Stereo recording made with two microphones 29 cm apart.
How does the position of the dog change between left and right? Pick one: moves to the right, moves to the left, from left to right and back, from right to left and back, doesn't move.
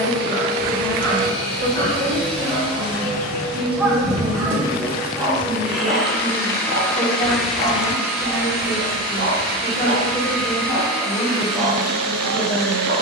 from left to right and back.